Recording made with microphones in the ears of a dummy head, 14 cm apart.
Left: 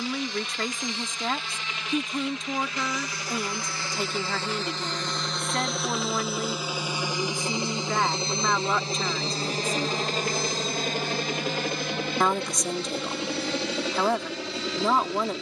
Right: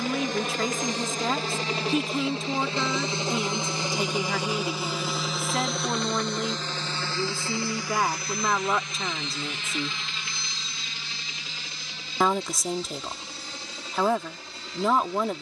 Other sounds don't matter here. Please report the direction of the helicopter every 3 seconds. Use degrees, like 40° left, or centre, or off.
30° right, 10° right, 20° left, 40° left, 50° left.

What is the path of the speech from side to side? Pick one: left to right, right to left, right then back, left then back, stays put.
stays put.